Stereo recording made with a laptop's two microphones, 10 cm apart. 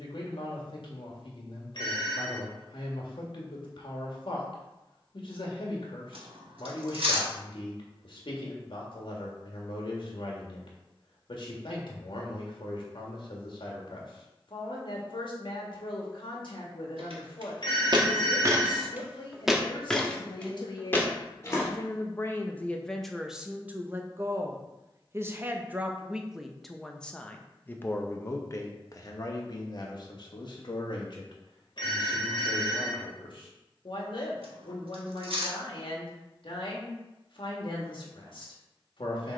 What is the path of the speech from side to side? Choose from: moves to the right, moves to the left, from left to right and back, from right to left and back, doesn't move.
from left to right and back.